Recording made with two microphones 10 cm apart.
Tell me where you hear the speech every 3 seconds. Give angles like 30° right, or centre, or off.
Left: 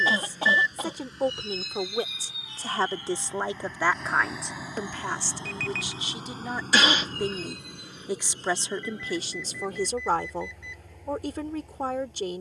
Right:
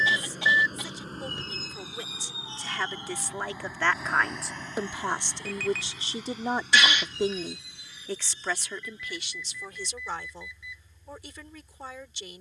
50° left, centre, centre, 50° left.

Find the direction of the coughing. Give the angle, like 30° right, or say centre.
40° left.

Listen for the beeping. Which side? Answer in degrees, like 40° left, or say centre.
centre.